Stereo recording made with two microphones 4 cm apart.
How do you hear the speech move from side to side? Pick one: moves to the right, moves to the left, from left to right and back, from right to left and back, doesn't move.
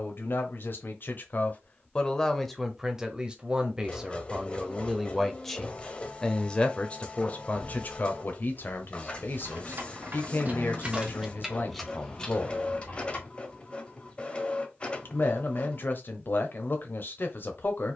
from left to right and back.